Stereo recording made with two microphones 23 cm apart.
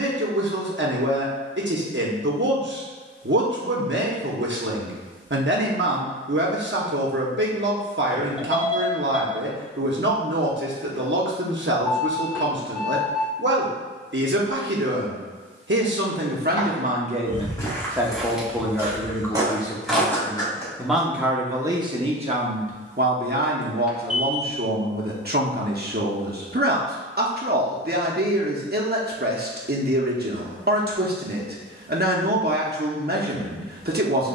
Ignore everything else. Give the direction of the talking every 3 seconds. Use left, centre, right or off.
right, right, right, right, right, right, centre, right, right, right, right, right.